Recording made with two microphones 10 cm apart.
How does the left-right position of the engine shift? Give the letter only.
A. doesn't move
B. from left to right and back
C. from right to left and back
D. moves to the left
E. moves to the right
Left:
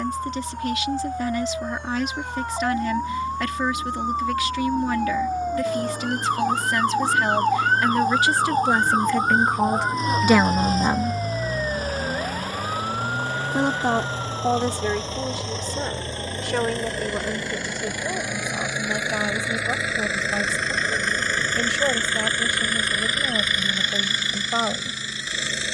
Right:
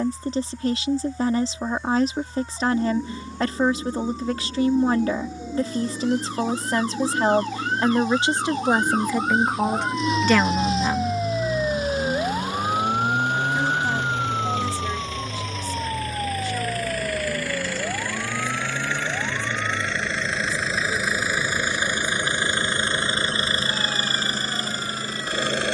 E.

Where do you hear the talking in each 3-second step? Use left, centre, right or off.
right, right, right, centre, left, left, left, left, left.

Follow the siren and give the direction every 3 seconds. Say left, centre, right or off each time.
left, left, left, centre, right, right, right, right, right.